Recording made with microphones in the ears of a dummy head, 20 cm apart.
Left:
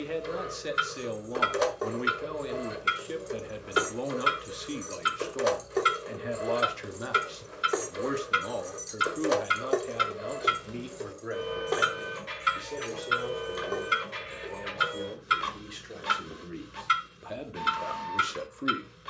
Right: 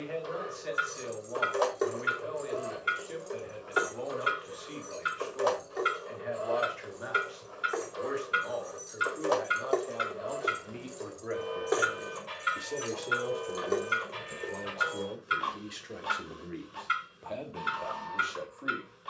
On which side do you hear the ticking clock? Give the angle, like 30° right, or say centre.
50° left.